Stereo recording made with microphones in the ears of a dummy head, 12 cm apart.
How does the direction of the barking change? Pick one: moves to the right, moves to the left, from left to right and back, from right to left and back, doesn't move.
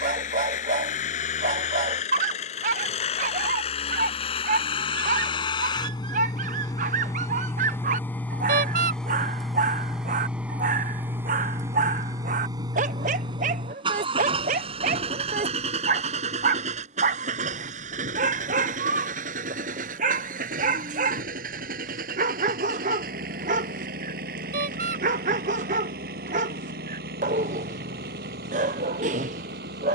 doesn't move.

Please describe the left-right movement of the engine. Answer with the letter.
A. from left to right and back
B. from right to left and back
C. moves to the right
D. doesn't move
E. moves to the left
C.